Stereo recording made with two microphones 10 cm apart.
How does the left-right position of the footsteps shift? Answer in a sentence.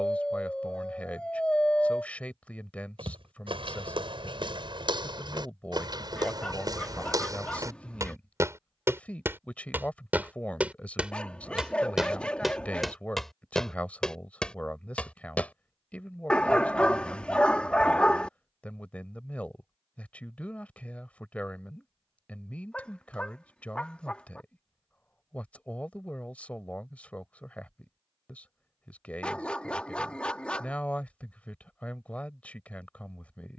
You can hear the footsteps move from right to left.